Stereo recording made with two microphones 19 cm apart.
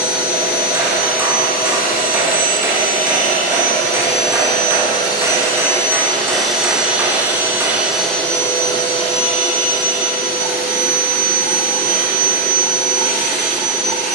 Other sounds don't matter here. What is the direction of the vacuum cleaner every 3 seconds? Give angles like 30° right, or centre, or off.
50° left, 30° left, centre, 50° left, 50° left.